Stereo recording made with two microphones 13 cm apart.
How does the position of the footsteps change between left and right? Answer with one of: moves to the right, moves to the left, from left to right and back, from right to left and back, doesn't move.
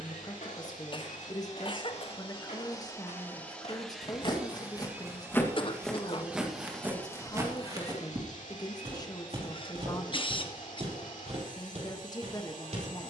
moves to the right.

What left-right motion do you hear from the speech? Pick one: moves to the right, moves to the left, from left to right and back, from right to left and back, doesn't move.
doesn't move.